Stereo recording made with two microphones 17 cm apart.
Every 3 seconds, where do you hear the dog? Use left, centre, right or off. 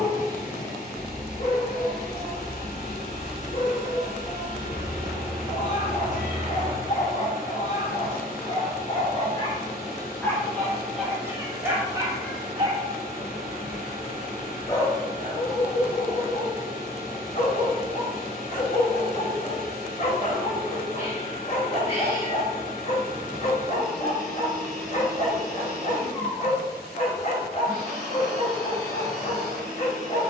left, left, left, centre, centre, left, left, left, left, left.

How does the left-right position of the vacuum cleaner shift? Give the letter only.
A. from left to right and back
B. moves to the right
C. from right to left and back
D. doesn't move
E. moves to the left
D.